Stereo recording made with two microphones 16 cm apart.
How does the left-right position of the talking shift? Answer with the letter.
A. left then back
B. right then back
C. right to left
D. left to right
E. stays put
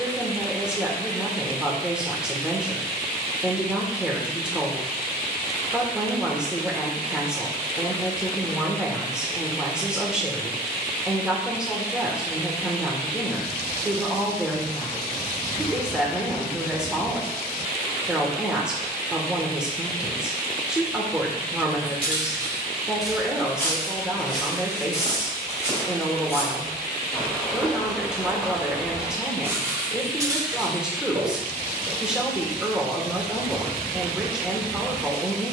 E.